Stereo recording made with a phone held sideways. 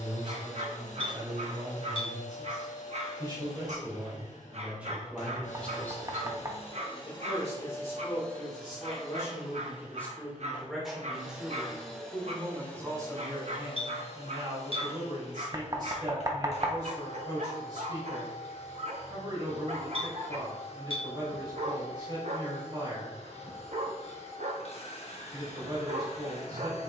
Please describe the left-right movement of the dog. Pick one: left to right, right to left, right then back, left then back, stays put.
stays put.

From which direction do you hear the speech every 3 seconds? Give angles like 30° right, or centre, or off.
40° right, 10° right, 40° left, 10° left, 30° right, 30° right, 30° right, 30° right, 30° right.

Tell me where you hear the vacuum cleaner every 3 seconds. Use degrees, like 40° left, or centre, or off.
60° left, 60° left, 30° left, centre, 30° left, 50° left, 50° left, 50° left, 50° left.